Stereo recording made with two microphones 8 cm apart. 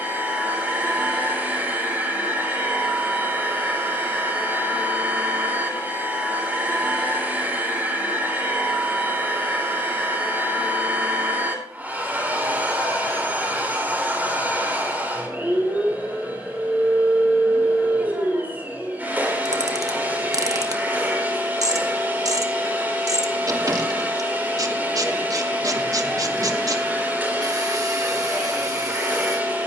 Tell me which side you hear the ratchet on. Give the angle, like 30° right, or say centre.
50° right.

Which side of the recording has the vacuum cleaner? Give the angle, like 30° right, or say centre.
20° right.